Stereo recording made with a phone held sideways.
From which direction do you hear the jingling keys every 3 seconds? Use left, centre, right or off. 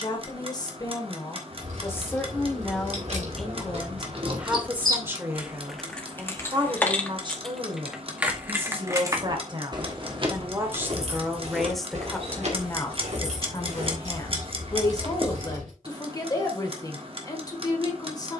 right, right, centre, right, right, right.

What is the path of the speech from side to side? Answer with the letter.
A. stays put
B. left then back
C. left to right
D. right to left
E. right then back
E.